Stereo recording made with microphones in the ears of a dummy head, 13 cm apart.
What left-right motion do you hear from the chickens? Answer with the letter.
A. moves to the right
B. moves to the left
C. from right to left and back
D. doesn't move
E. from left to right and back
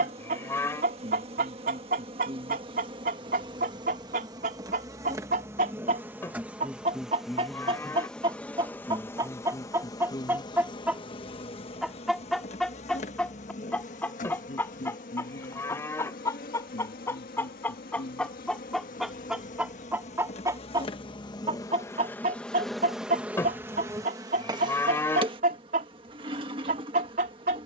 C.